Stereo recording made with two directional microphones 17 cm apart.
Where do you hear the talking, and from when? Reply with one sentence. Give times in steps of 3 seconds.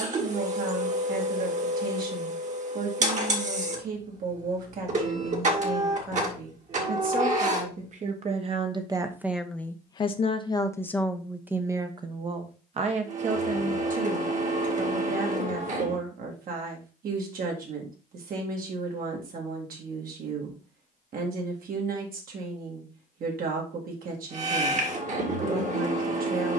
In this clip you hear the talking on the right from 0 s, in the centre from 9 s and on the right from 12 s.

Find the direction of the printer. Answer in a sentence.
You can hear the printer on the right.